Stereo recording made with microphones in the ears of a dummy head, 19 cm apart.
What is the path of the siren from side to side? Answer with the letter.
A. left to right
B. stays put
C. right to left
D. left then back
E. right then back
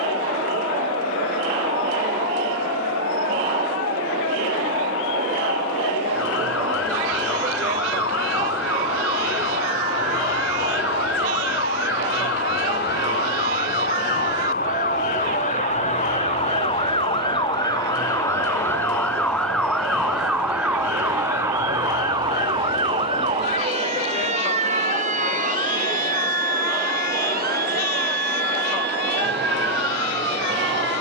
A.